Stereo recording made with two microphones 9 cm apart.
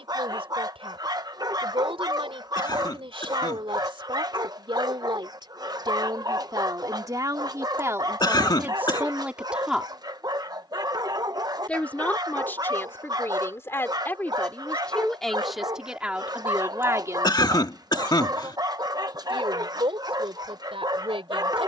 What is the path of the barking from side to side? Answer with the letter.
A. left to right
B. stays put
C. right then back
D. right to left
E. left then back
B.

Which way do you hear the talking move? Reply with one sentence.
You can hear the talking move from right to left and back again.